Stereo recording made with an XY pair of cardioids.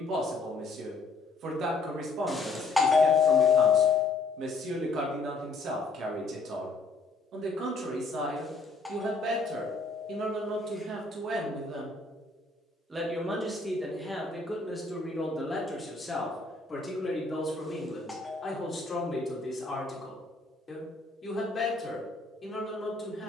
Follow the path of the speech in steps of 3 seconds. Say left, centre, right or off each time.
right, right, right, right, centre, left, left, left.